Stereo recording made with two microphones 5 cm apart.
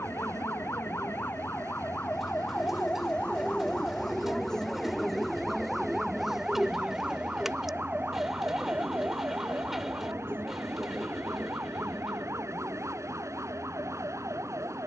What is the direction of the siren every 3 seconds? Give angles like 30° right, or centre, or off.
40° left, 10° left, 20° right, 40° right, 60° right.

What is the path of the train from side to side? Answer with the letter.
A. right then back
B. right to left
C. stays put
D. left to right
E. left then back
C.